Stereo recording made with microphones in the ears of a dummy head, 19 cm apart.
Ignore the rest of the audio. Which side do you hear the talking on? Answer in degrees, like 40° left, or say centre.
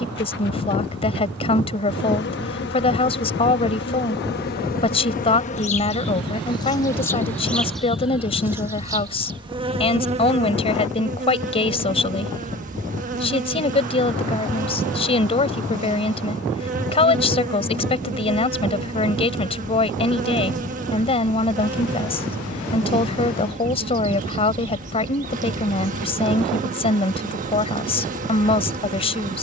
30° left.